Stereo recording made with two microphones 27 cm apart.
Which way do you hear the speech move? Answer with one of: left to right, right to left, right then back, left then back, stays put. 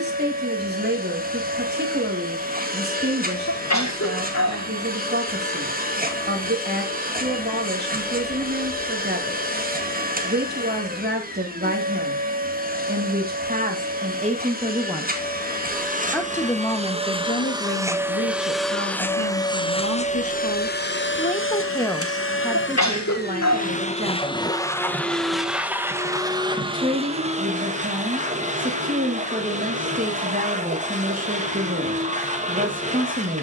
left then back.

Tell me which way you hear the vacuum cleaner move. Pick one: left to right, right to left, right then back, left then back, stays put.
left then back.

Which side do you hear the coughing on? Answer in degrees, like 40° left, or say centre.
80° left.